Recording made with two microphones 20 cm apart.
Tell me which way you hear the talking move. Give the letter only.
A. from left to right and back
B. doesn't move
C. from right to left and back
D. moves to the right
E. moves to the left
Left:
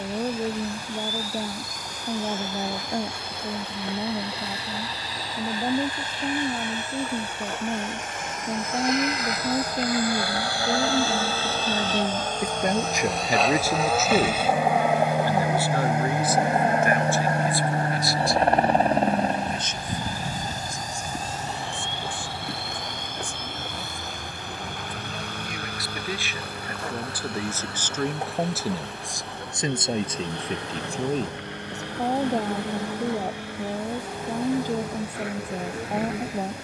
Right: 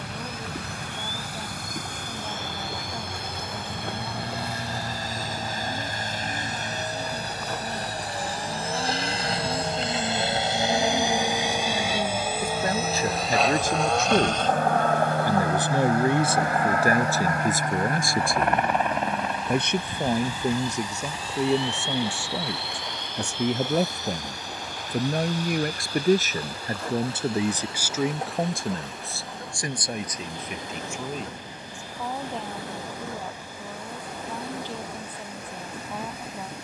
A.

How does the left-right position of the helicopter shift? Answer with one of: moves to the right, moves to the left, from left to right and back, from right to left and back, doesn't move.
moves to the left.